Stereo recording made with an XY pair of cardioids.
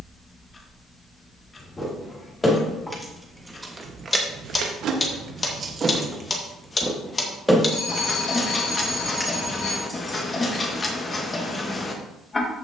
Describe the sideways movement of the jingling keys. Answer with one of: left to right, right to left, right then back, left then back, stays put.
right then back.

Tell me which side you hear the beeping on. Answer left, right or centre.
left.